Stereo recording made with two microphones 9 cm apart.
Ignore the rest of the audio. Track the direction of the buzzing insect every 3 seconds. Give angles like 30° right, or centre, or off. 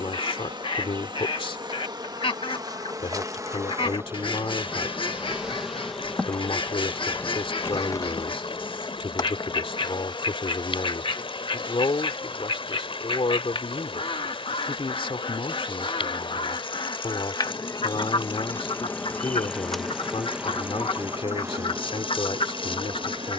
50° right, 20° right, 30° left, 60° left, 70° left, 50° left, 10° left, 40° right.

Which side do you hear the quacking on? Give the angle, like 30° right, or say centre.
60° left.